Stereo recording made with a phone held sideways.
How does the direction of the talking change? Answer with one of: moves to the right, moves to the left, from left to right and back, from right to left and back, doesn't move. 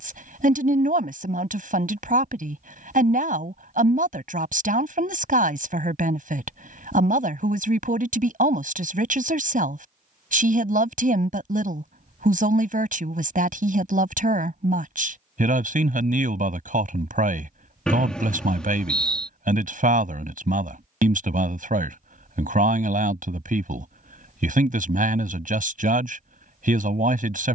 doesn't move.